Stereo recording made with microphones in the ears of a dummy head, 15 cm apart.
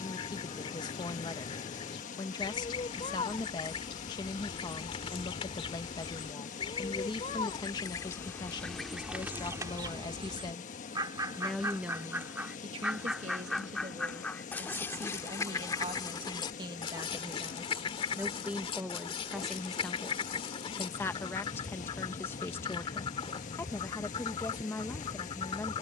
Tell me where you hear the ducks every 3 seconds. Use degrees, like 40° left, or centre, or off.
30° left, 30° left, 20° left, 20° right, centre, 30° left, 30° left, 30° left, 30° left.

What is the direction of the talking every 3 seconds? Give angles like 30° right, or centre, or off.
30° left, 30° left, 30° left, 20° left, 40° right, 30° right, centre, 10° left, 10° left.